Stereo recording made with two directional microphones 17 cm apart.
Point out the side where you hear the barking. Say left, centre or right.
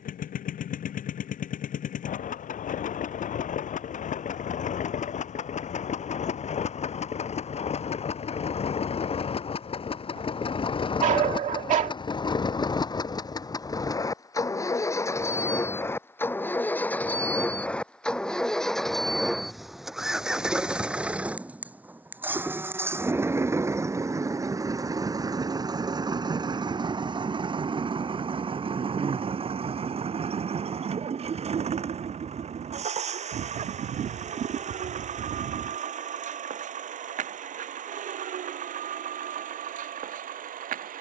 right.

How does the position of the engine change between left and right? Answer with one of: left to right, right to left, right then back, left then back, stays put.
left to right.